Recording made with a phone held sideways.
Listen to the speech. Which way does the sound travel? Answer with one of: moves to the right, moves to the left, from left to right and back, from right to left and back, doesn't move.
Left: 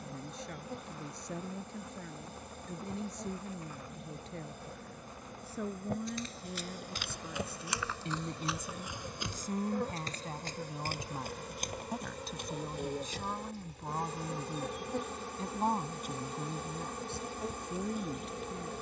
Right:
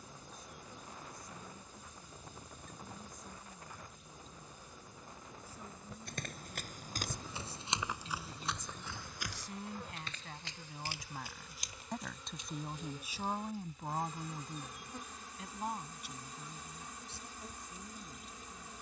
from left to right and back.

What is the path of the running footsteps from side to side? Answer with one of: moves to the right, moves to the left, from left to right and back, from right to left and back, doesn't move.
moves to the left.